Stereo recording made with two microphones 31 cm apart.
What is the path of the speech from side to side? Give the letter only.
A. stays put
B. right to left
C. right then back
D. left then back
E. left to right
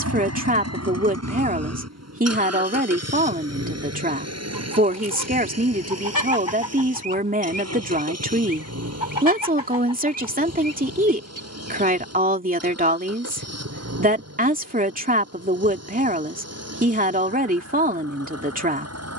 A.